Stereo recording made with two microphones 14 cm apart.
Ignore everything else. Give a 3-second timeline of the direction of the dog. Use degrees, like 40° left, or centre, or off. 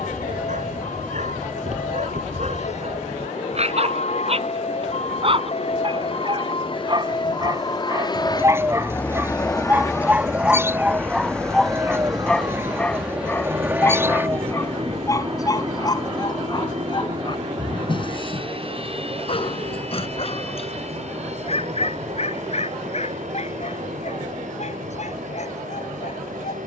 60° right, 50° right, 30° right, 10° right, 10° left, 30° left, 40° left, 50° left, 60° left.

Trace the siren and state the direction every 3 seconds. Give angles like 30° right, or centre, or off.
70° left, 50° left, 30° left, 10° right, 40° right, 50° right, 60° right, 60° right, 70° right.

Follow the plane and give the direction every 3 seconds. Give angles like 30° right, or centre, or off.
60° left, 50° left, 40° left, 10° left, 10° right, 30° right, 40° right, 50° right, 60° right.